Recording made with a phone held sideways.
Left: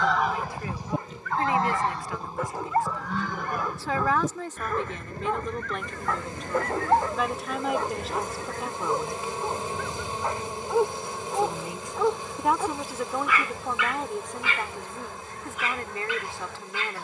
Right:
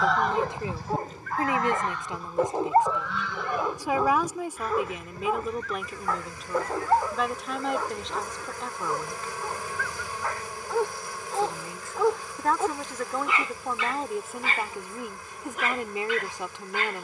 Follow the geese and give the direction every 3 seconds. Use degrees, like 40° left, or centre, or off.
30° left, 50° left, 60° left, 60° left, 60° left, 60° left.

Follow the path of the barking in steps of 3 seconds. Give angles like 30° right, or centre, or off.
40° right, 10° right, 10° left, 10° left, 30° right, 50° right.